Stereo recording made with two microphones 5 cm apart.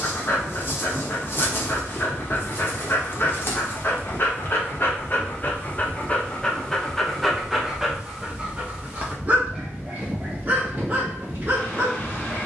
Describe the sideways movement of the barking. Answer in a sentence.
In this clip you hear the barking move from left to right.